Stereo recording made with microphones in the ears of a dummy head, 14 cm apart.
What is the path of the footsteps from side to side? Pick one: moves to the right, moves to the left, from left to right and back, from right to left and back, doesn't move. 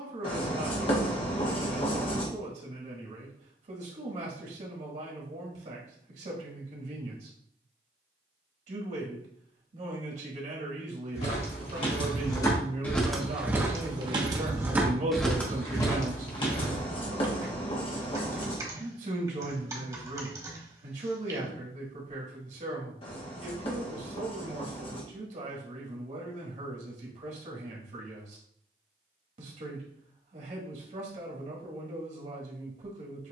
from left to right and back.